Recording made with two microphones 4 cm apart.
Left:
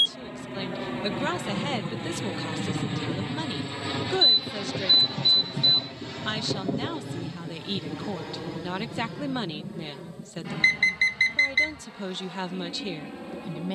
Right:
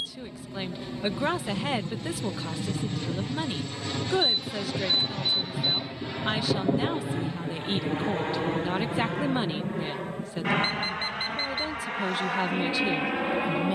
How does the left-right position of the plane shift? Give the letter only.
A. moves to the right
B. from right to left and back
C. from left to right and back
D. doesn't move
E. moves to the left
A.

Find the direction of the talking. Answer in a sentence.
You can hear the talking in the centre.